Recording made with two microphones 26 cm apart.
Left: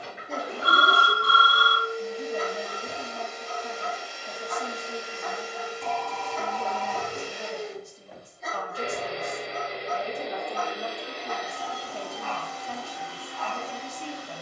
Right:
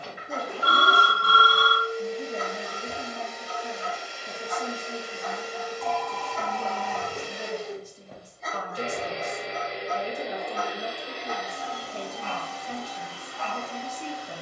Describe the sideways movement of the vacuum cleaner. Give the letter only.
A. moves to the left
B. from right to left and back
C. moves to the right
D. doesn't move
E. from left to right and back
E.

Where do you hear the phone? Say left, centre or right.
left.